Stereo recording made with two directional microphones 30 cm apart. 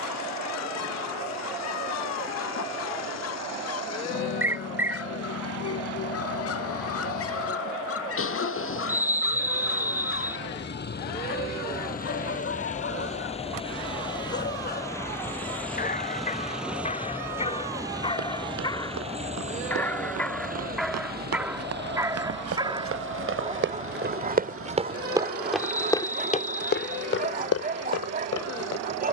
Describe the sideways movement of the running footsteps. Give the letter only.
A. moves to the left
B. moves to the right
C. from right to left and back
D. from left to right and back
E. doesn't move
A.